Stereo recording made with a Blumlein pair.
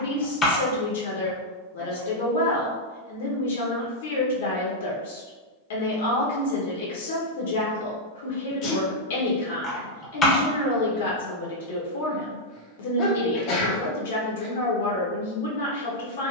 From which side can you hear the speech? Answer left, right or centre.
left.